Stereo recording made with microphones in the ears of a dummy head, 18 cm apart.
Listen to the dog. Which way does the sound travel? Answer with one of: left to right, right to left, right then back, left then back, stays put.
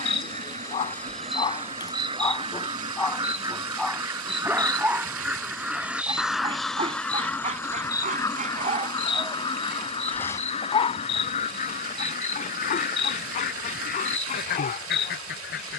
right then back.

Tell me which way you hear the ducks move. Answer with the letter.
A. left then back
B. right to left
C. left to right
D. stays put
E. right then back
B.